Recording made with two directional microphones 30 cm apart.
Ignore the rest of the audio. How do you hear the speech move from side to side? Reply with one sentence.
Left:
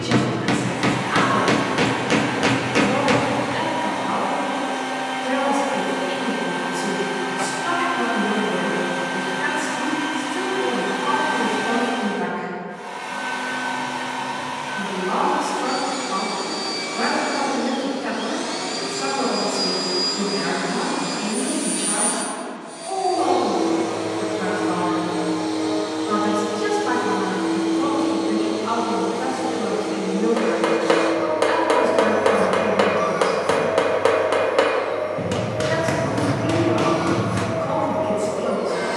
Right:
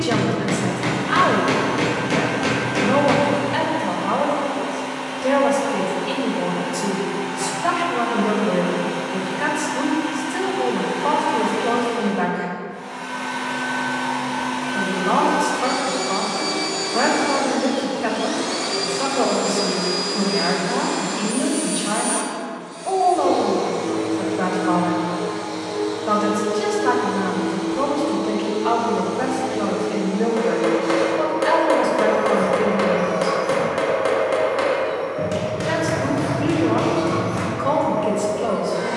In this clip you hear the speech stay in one place.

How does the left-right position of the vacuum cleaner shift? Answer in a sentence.
In this clip you hear the vacuum cleaner move from left to right and back again.